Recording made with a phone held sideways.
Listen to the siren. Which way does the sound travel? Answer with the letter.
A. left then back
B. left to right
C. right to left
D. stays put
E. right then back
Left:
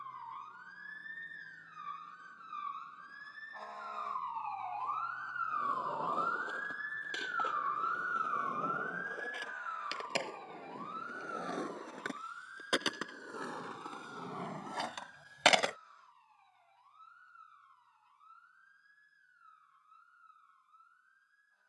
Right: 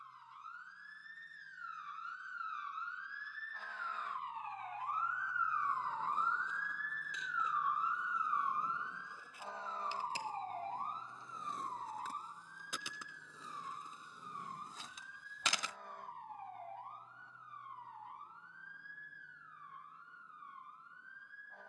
B.